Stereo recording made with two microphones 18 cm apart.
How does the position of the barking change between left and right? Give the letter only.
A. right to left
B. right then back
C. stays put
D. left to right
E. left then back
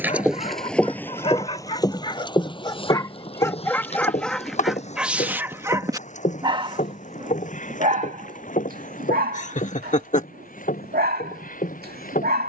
D.